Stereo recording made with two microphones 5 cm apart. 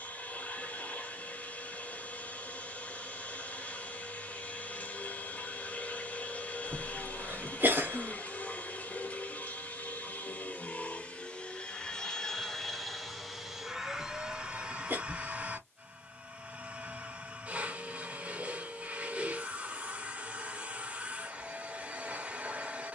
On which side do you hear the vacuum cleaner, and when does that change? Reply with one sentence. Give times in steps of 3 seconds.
You can hear the vacuum cleaner on the left from 0 s, in the centre from 12 s and on the right from 15 s.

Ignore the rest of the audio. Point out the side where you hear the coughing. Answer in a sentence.
You can hear the coughing on the right.